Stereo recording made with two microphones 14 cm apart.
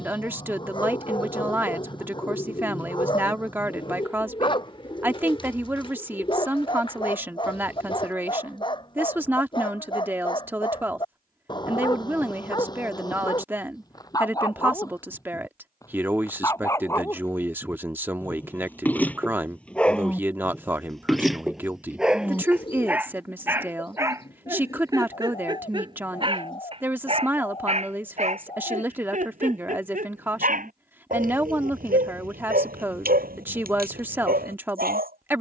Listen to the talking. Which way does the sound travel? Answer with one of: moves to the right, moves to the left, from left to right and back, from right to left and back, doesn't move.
doesn't move.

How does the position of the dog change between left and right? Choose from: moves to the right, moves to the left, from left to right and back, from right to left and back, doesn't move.
moves to the right.